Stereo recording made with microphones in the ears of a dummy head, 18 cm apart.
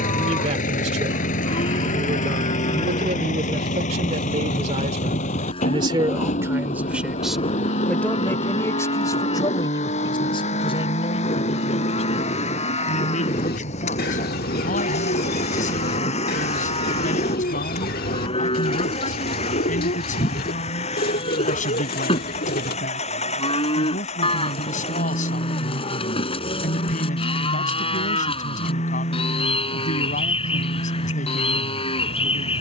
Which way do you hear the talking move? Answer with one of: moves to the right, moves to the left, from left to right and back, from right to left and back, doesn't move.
moves to the left.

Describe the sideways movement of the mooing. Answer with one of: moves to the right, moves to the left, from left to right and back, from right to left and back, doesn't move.
doesn't move.